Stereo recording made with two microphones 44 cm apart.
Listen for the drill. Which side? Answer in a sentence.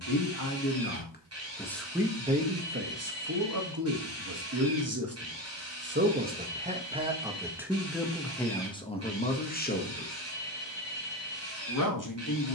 In this clip you hear the drill on the right.